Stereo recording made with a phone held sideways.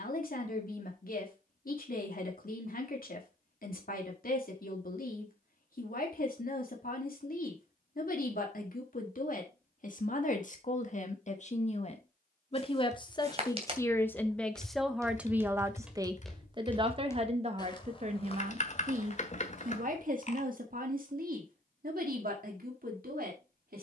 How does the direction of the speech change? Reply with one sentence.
In this clip you hear the speech move to the right.